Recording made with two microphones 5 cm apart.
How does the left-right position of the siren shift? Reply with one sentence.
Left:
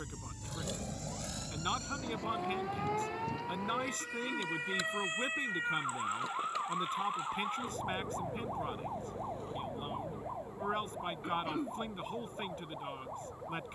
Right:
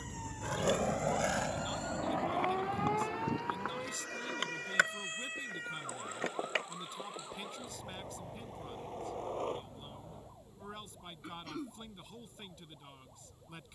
In this clip you hear the siren move from right to left.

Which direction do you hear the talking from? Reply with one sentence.
In this clip you hear the talking on the left.